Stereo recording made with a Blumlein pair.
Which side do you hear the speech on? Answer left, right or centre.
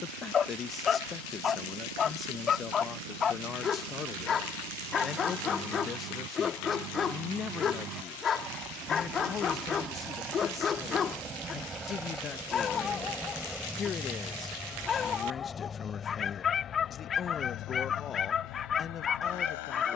left.